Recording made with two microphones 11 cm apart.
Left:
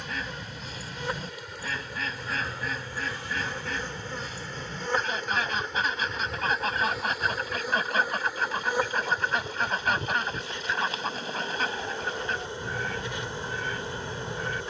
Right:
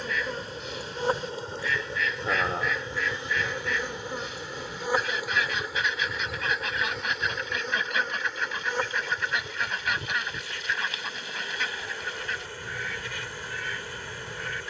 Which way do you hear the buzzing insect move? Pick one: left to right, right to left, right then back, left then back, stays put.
right to left.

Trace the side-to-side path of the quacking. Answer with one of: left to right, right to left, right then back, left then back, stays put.
stays put.